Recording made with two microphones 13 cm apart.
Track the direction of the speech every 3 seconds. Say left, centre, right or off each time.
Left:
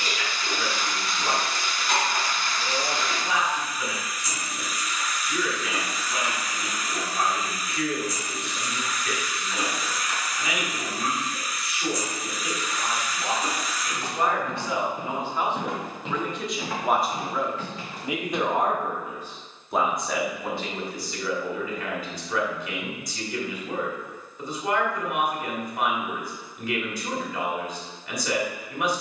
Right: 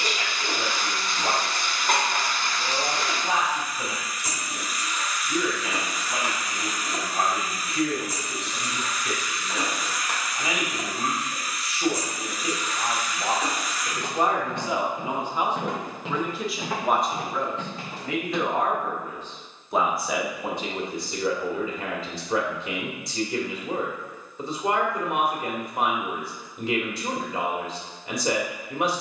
right, right, right, right, right, centre, centre, right, right, right.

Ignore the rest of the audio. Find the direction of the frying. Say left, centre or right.
right.